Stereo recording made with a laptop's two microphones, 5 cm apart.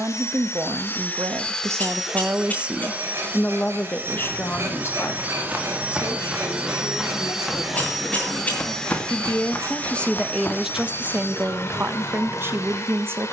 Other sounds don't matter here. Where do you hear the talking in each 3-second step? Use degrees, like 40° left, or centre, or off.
50° right, 40° left, 60° left, 10° right, 50° right.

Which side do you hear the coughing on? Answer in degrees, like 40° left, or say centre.
30° left.